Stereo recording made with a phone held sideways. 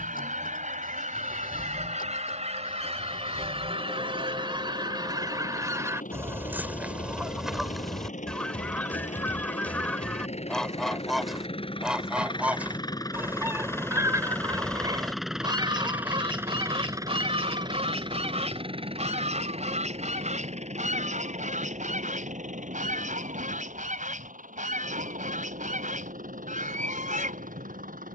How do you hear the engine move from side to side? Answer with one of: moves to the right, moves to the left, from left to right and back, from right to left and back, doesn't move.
moves to the right.